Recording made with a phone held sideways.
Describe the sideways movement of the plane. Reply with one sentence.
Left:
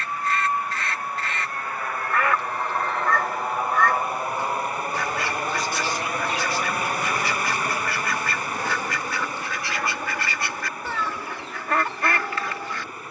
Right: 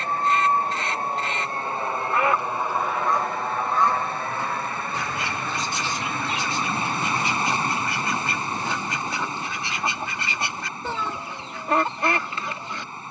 In this clip you hear the plane go from the right side to the left.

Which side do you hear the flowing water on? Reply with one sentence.
In this clip you hear the flowing water on the right.